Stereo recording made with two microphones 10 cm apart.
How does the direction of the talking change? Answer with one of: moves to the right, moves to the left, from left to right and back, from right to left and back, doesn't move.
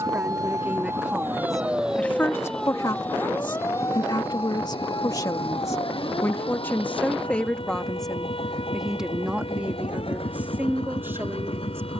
from right to left and back.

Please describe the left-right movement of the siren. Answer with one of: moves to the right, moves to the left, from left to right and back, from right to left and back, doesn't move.
moves to the left.